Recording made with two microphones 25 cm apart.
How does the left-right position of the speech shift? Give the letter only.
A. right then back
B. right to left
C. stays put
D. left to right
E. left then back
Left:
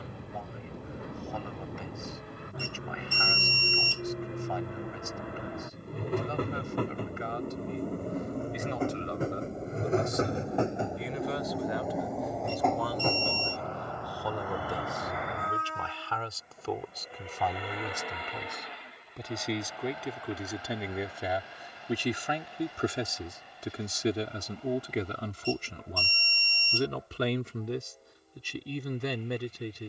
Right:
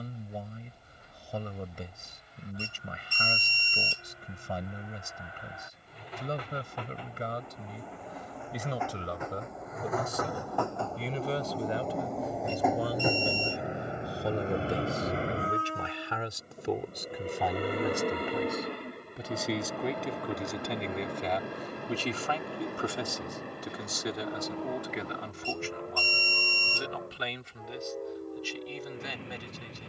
B.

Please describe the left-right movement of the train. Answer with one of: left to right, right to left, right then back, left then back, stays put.
left to right.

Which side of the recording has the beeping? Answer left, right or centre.
right.